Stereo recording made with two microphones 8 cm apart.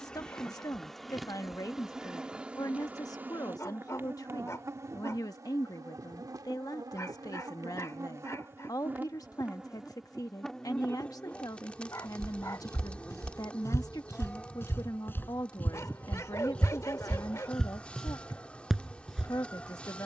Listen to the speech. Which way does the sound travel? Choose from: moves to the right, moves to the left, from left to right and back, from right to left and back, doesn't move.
doesn't move.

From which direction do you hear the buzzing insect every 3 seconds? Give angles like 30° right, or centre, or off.
centre, 40° right, 50° right, centre, 20° left, 20° left, 20° left.